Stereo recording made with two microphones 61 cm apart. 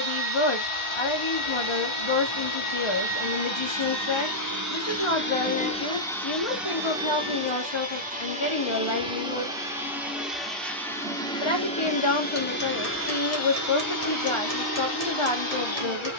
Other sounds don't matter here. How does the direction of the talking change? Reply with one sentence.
You can hear the talking stay in one place.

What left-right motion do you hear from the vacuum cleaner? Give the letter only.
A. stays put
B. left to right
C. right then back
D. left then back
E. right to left
C.